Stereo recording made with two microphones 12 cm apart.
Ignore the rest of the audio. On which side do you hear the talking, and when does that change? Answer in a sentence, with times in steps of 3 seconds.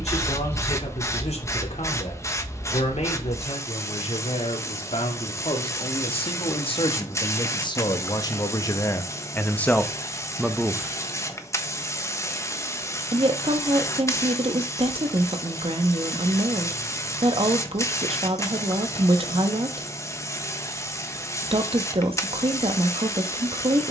In this clip you hear the talking on the left from 0 s, in the centre from 9 s and on the right from 12 s.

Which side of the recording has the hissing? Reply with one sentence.
In this clip you hear the hissing on the left.